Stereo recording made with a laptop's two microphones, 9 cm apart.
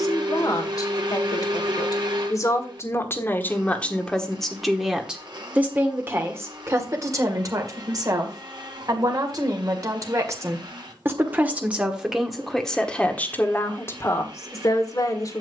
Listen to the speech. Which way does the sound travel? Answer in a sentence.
In this clip you hear the speech go right and come back.